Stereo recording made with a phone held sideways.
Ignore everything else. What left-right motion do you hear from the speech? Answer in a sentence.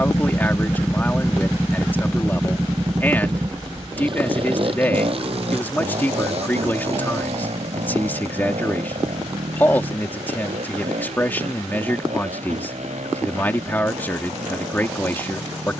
In this clip you hear the speech stay put.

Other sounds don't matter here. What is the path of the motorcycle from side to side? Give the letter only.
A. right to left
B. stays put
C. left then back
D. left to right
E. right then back
D.